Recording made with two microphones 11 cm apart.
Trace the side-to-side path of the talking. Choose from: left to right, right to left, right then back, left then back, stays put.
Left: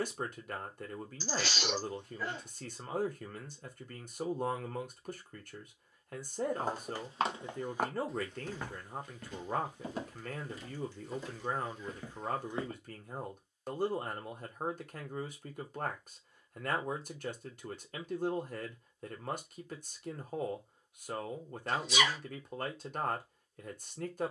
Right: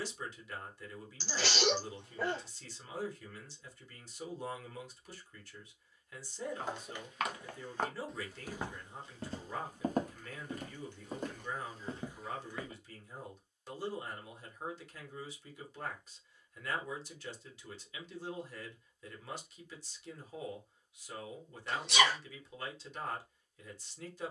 stays put.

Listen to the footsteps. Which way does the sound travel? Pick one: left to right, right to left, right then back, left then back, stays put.
right then back.